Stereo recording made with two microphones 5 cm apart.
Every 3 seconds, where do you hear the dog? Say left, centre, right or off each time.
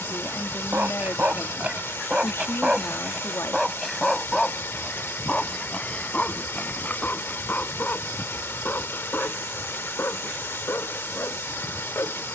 right, centre, left, left.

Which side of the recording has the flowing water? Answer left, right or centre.
left.